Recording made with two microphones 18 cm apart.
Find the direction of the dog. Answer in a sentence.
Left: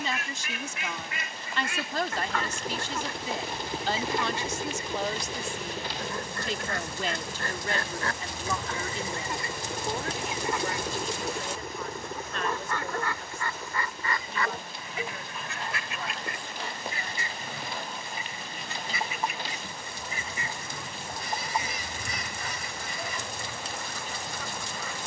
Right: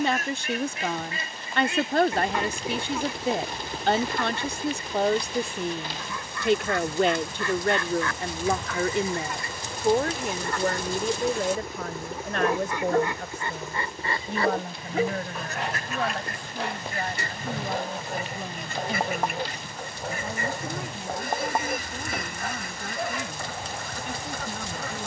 In this clip you hear the dog on the right.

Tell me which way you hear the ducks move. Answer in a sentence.
You can hear the ducks go left and come back.